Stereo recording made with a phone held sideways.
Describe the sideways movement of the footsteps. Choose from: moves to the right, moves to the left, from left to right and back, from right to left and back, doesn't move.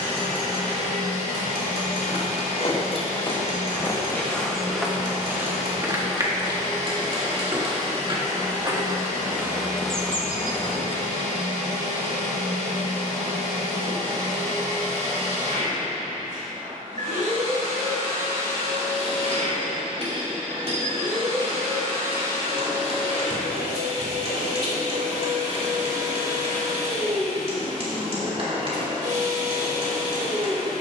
from left to right and back.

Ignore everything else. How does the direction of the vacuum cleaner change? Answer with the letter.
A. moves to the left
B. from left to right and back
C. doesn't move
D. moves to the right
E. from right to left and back
C.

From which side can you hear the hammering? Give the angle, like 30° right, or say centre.
50° right.